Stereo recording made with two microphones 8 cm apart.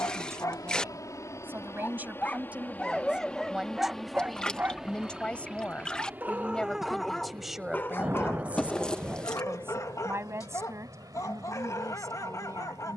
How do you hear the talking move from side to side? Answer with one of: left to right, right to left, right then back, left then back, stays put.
left then back.